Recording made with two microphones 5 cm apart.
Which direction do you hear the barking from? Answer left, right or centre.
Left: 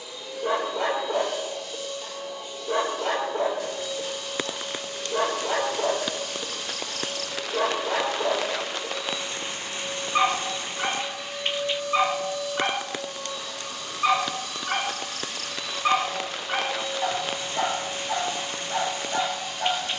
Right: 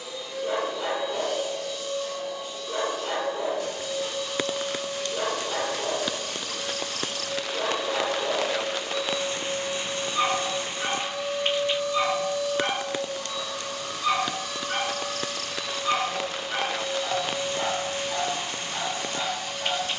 left.